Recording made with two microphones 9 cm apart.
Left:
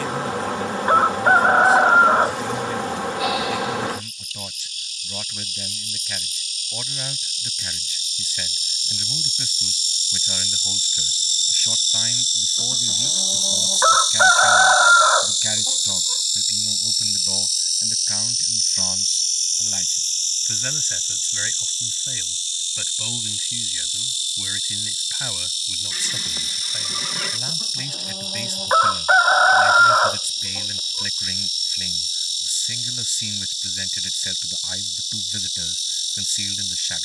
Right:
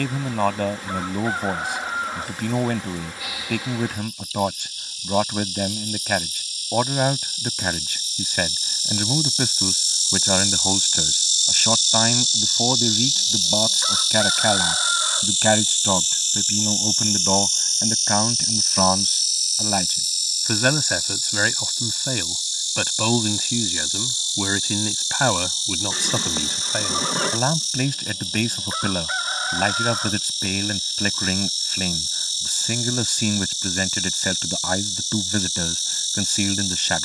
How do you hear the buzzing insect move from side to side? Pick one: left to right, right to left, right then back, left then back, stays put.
left to right.